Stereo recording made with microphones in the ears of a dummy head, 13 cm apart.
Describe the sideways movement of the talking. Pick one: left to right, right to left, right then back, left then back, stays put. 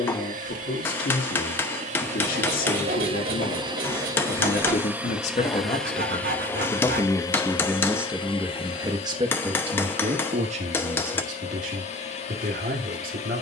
left to right.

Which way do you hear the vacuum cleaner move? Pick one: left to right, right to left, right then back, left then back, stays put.
right to left.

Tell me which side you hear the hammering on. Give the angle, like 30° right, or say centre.
10° left.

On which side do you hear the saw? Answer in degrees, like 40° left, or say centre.
70° right.